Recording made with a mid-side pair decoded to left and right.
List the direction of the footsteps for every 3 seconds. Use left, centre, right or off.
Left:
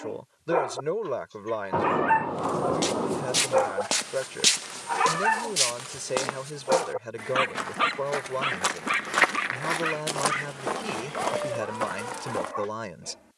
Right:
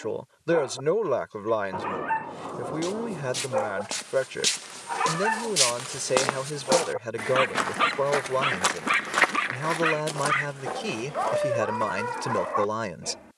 left, left, right, left, left.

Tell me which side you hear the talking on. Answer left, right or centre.
right.